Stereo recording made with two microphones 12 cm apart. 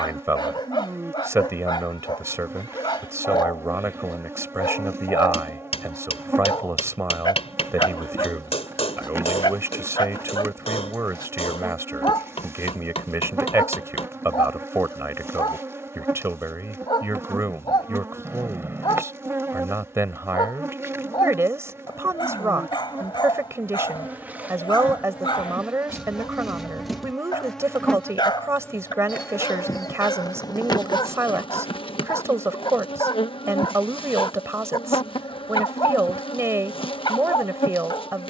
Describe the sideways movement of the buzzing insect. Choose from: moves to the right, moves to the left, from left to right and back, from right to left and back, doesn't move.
moves to the left.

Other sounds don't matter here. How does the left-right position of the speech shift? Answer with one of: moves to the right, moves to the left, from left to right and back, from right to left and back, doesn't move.
doesn't move.